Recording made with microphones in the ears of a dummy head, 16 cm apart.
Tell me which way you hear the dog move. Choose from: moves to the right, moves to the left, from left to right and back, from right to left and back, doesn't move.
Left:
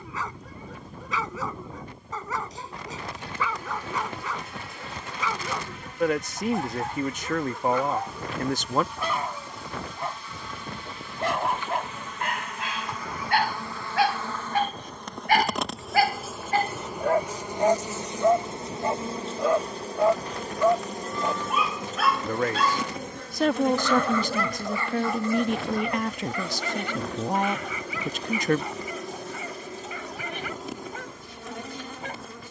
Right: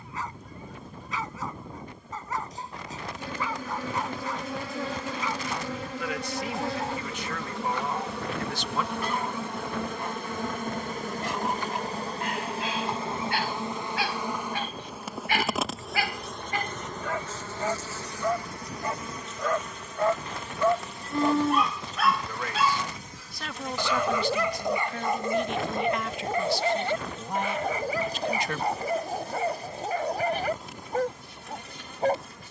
moves to the right.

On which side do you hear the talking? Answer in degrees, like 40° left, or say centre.
40° left.